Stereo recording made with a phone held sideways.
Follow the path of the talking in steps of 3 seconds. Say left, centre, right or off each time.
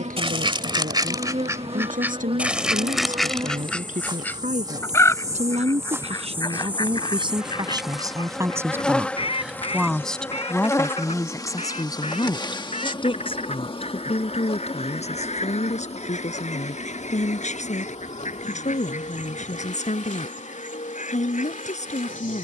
right, right, right, centre, left, left, left, left.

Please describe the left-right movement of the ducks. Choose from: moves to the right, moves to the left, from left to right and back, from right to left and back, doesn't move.
moves to the left.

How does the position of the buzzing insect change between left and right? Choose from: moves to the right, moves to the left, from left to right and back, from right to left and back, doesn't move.
moves to the left.